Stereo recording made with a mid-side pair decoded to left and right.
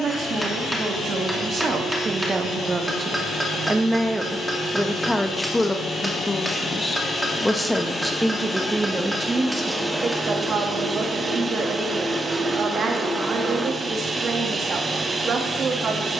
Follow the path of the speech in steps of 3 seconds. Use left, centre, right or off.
right, centre, centre, right, right, right.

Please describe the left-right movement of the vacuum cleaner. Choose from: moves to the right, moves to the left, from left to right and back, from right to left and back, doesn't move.
moves to the right.